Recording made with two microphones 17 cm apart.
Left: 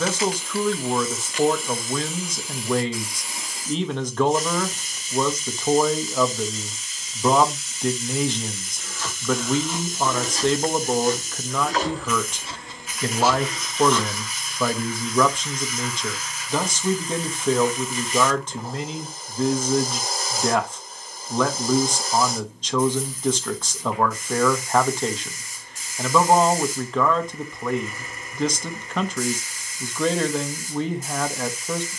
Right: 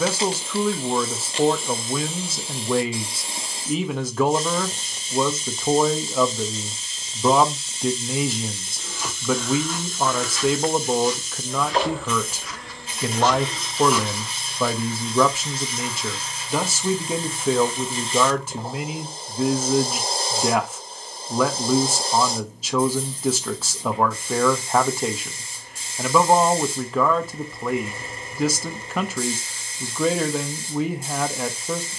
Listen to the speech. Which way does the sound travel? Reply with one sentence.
In this clip you hear the speech stay in one place.